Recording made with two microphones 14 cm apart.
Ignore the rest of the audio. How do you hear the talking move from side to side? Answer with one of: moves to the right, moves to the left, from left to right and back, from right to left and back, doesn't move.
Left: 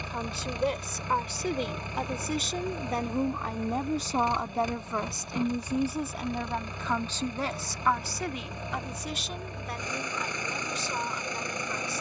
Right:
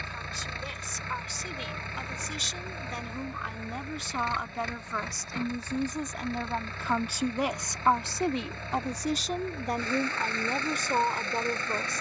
moves to the right.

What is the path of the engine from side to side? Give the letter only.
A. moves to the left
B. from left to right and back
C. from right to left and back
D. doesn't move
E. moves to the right
D.